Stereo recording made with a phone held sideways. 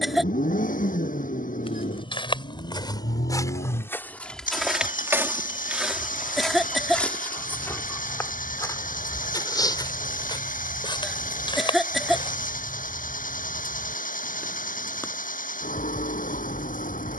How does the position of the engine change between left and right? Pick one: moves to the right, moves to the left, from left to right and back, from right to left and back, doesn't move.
doesn't move.